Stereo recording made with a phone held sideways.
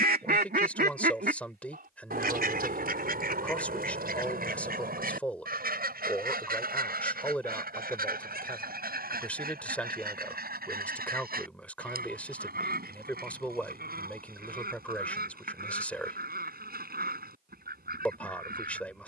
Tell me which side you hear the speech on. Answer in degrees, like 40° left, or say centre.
10° left.